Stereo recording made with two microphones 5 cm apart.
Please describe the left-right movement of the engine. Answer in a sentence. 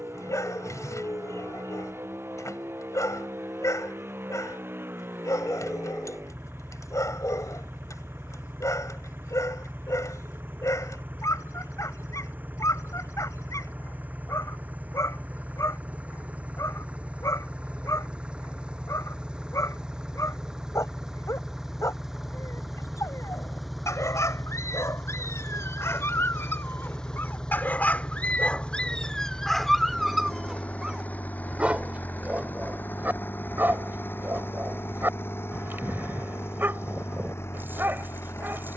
In this clip you hear the engine move from right to left.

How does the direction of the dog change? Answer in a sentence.
You can hear the dog travel towards the right.